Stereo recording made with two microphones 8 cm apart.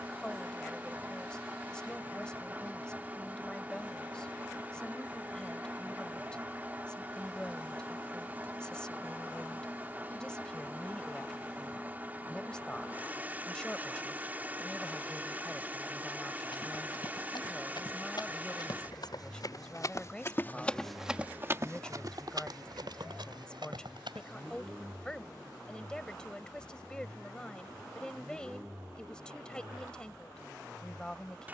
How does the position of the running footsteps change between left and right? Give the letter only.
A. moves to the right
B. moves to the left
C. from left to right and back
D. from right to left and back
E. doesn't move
A.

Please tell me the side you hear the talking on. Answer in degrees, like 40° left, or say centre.
10° left.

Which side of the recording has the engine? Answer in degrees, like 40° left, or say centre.
20° right.